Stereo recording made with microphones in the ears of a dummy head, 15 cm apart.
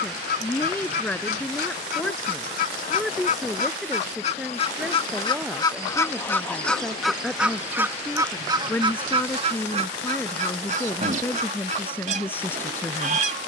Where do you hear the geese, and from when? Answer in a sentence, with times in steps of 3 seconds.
You can hear the geese on the left from 0 s, in the centre from 6 s and on the right from 9 s.